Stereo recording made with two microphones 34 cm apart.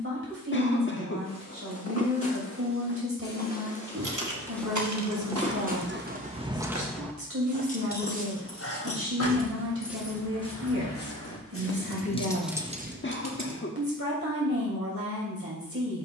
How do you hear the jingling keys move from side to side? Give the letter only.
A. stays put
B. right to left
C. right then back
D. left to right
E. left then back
E.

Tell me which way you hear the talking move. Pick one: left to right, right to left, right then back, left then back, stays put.
stays put.